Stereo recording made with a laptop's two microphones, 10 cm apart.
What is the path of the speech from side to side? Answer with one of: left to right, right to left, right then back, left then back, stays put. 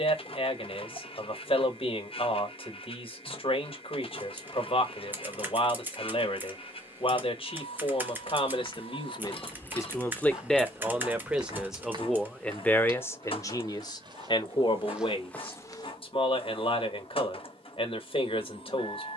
right then back.